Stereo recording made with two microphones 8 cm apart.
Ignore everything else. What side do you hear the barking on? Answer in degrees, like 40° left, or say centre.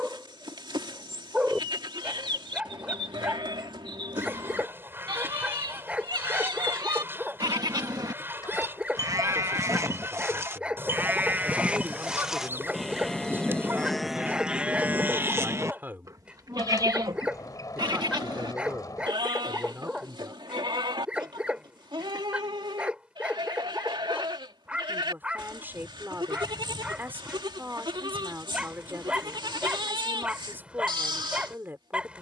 10° right.